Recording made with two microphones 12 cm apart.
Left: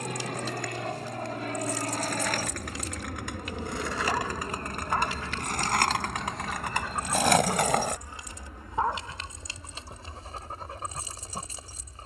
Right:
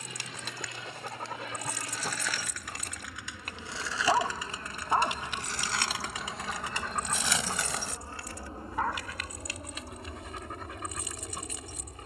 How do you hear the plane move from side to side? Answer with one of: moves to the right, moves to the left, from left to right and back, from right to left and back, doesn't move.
moves to the right.